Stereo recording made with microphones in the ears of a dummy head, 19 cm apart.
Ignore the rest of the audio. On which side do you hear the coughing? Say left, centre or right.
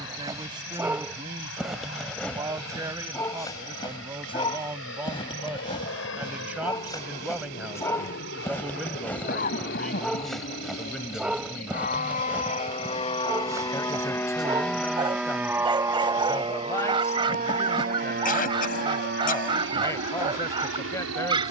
left.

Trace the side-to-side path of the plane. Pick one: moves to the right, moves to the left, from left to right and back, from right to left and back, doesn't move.
moves to the right.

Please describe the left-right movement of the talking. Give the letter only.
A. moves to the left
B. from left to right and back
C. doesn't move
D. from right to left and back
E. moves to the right
A.